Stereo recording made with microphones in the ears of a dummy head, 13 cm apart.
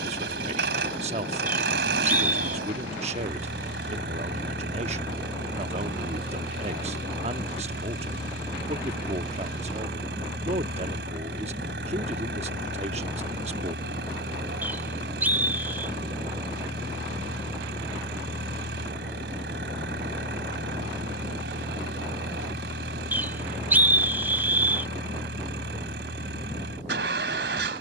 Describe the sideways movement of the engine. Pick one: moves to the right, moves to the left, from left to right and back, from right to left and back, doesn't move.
doesn't move.